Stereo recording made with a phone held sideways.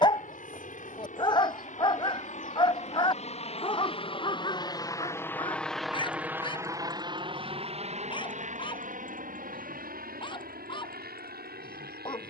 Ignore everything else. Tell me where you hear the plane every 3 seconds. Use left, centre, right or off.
left, left, right, right.